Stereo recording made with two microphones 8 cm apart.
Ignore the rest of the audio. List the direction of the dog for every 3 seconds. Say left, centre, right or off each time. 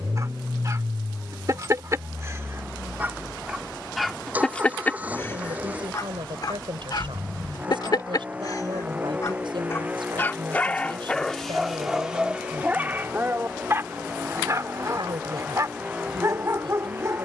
right, centre, left, centre, right, right.